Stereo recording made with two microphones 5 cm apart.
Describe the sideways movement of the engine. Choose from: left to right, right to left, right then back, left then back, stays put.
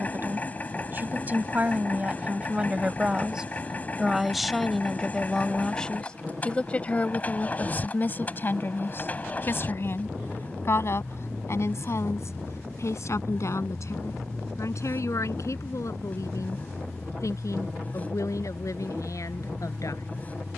stays put.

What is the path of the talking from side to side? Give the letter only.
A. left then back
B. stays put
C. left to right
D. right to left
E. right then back
D.